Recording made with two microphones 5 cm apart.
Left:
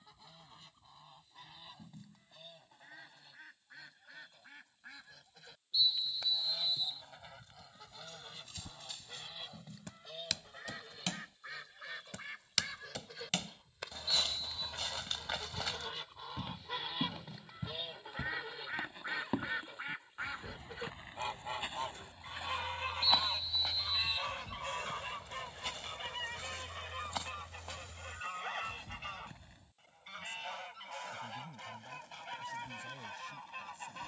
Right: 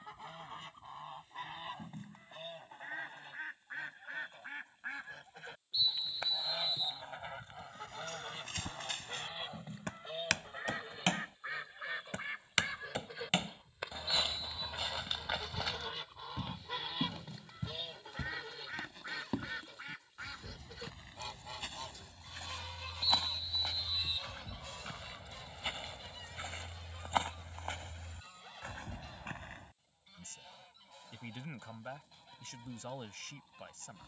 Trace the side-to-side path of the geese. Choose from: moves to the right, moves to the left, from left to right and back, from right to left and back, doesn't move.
moves to the left.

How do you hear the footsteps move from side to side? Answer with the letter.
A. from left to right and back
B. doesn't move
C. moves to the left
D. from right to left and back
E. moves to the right
D.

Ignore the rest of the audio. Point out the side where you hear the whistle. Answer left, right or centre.
right.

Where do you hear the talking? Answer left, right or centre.
right.